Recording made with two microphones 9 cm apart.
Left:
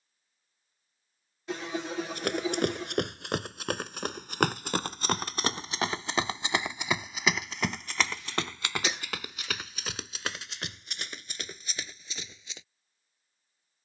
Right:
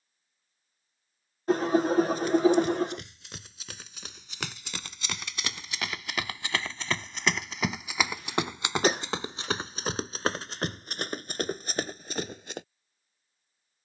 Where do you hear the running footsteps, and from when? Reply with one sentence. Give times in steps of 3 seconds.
You can hear the running footsteps on the left from 0 s, in the centre from 6 s and on the right from 9 s.